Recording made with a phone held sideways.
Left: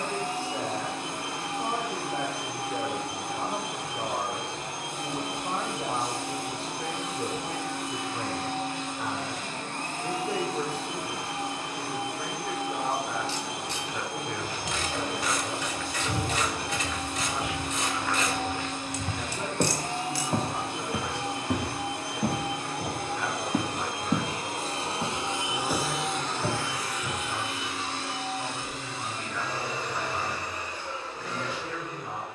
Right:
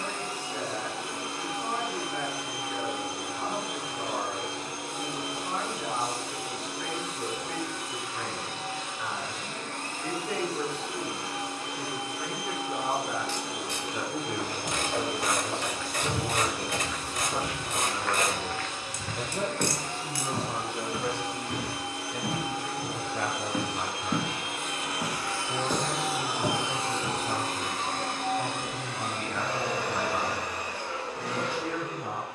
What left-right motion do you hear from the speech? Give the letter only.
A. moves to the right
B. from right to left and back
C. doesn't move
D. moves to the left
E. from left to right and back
A.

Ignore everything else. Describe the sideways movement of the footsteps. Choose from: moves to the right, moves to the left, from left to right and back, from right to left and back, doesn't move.
from right to left and back.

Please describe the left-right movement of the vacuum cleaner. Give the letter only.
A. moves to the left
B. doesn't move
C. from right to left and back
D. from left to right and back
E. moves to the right
E.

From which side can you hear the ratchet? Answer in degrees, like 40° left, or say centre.
50° right.